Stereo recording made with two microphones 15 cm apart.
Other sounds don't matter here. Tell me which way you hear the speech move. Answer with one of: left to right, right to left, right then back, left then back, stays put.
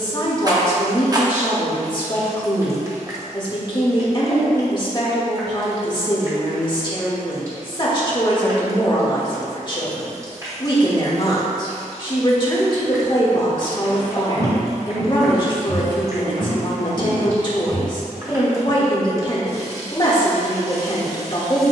stays put.